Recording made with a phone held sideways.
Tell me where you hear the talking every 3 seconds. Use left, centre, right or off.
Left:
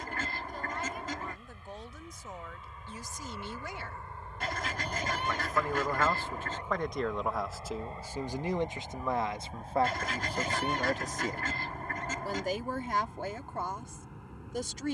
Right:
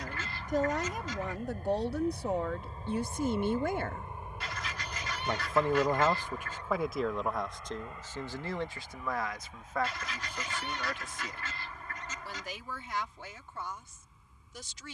right, right, centre, left, left.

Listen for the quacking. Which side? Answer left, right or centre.
left.